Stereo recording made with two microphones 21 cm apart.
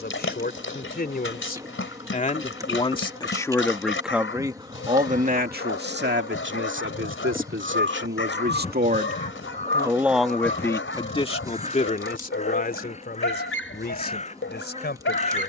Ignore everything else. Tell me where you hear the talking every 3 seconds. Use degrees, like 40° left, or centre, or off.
40° left, 20° right, 60° right, 10° left, 50° left.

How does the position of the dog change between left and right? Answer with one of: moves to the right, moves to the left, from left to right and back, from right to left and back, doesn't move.
doesn't move.